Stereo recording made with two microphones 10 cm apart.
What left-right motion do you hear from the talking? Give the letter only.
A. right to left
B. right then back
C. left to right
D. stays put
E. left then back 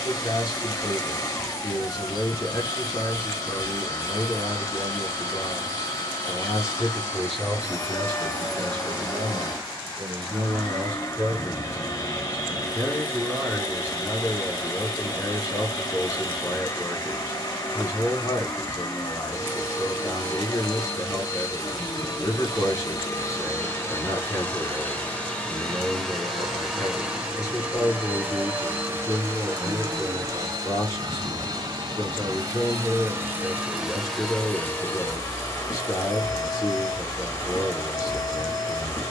B.